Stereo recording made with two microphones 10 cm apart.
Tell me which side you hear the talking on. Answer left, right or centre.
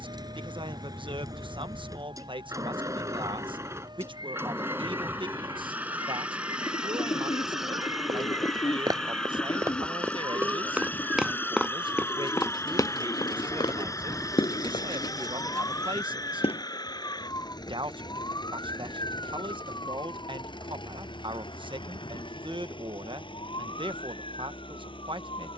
right.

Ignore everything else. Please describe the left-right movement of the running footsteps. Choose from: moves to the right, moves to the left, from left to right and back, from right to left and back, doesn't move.
moves to the left.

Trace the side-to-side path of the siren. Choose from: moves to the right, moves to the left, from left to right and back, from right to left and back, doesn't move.
moves to the left.